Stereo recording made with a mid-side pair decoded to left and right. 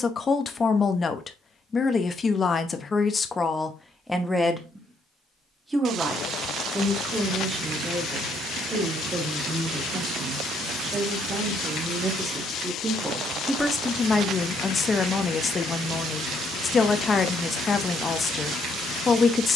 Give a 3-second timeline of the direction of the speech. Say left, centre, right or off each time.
left, centre, right, right, centre, left, left.